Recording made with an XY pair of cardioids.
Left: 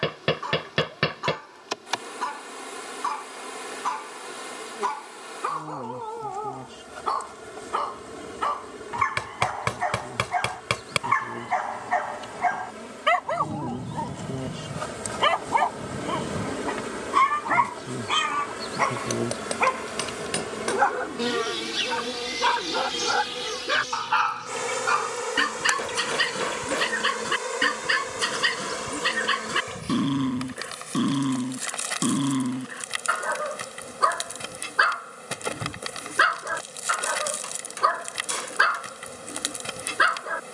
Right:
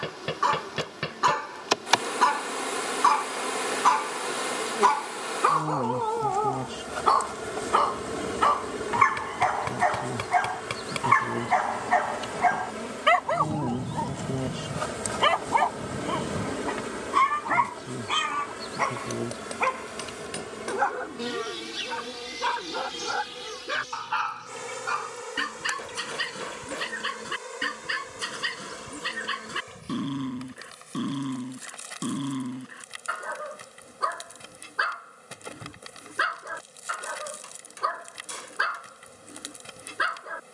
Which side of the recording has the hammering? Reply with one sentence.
You can hear the hammering on the left.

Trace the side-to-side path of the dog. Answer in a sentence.
You can hear the dog move to the left.